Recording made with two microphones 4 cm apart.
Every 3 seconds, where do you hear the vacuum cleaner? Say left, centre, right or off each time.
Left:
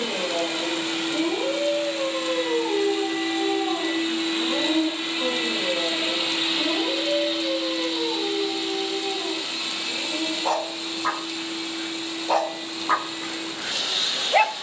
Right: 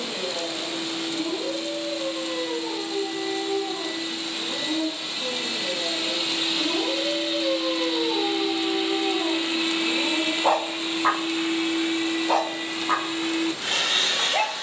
left, left, centre, right, right.